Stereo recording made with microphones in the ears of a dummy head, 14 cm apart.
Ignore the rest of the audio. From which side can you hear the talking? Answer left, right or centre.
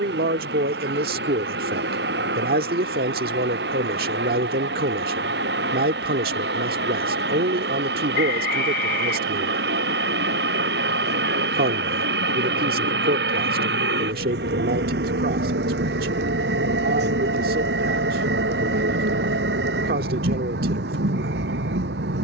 right.